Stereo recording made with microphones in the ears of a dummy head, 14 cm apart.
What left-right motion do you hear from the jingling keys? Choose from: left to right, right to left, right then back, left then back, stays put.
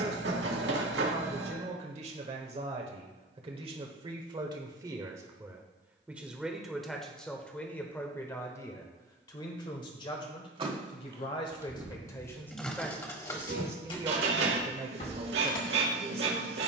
right to left.